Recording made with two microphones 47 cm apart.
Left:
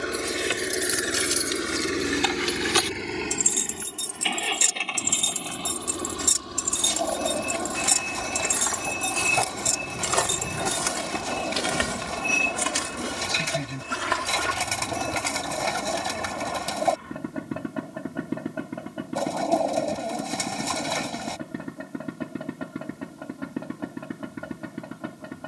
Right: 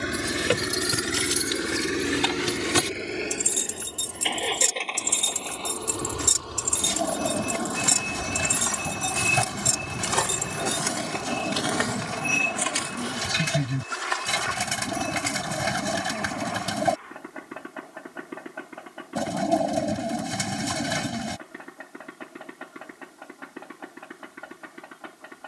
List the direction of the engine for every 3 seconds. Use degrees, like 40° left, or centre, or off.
10° right, 30° left, 40° left, 50° left, 50° left, 50° left, 60° left, 60° left, 60° left.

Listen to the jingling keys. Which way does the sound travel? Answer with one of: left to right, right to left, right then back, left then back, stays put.
right to left.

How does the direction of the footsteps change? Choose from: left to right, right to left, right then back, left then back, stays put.
right to left.